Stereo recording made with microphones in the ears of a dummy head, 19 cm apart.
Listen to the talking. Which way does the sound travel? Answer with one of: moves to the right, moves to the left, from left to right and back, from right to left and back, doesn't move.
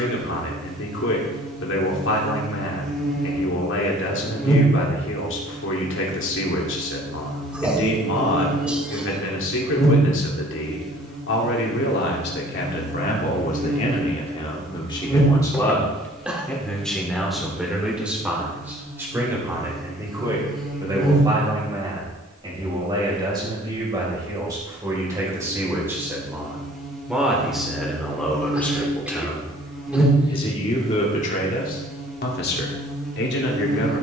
from left to right and back.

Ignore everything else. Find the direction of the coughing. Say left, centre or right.
centre.